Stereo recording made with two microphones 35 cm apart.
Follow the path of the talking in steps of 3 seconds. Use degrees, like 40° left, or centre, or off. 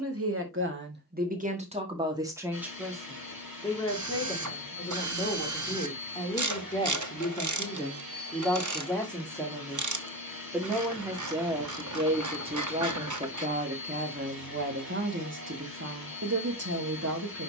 20° right, 10° left, 10° left, centre, 20° right, 40° right.